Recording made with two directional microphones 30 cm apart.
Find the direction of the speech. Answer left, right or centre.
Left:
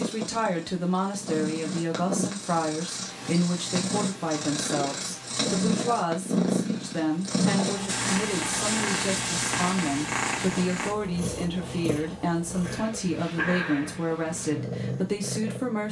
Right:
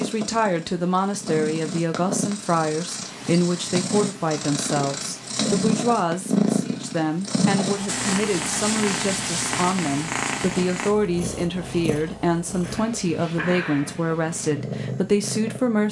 right.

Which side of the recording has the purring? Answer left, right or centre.
right.